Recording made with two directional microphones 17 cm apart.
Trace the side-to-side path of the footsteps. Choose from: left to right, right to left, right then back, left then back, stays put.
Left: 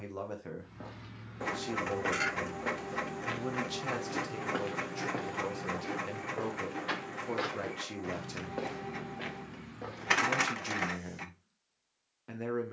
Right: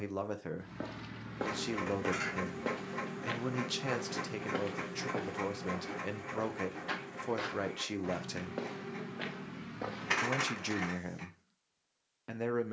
left then back.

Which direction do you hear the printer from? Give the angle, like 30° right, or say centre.
30° left.